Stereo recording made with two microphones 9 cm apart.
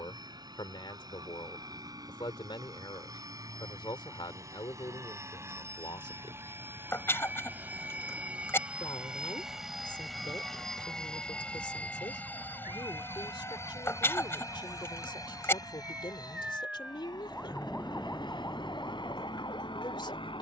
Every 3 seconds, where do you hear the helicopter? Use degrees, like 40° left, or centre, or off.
50° right, 40° right, 20° right, centre, 30° left, 50° left, 60° left.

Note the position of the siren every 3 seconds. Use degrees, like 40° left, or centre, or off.
60° right, 60° right, 60° right, 50° right, 40° right, 10° right, 50° left.